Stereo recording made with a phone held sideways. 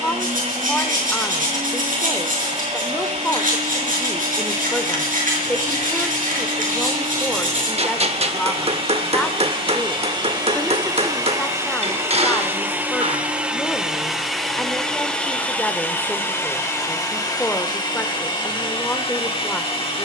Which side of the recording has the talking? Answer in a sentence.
You can hear the talking in the centre.